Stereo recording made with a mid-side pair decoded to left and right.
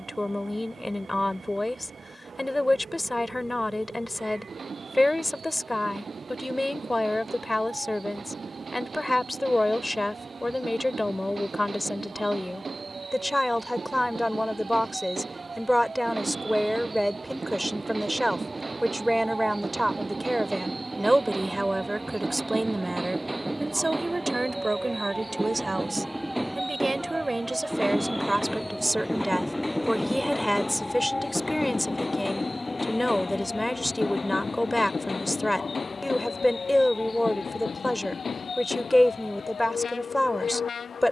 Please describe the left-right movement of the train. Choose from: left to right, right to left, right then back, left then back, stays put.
right to left.